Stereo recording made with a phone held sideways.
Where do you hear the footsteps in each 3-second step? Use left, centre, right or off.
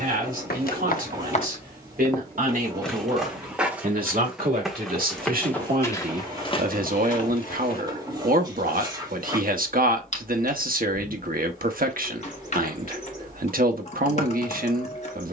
left, centre, left, off, off.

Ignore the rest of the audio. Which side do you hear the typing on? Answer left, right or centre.
left.